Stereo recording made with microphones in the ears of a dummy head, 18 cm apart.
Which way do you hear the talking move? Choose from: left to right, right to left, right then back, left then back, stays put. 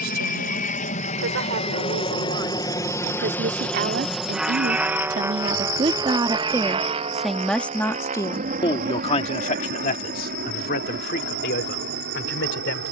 right to left.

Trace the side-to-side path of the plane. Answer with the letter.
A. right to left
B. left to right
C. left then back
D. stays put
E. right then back
B.